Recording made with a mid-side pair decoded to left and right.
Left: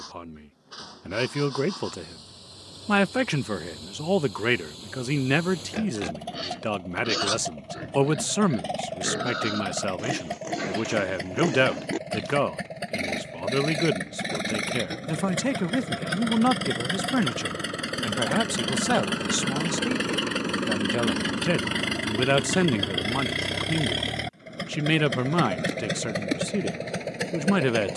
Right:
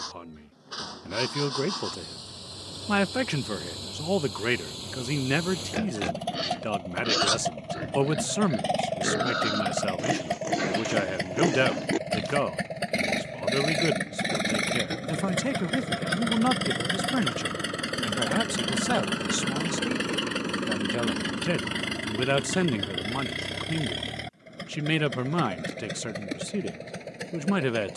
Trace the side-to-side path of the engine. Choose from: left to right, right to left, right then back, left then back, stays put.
right to left.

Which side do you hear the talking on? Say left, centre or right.
left.